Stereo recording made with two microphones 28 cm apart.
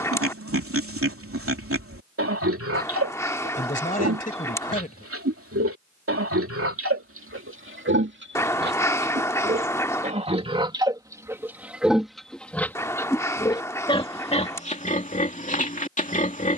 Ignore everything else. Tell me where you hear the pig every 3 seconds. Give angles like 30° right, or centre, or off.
50° right, 50° right, 50° right, 20° right, 20° left, 30° left.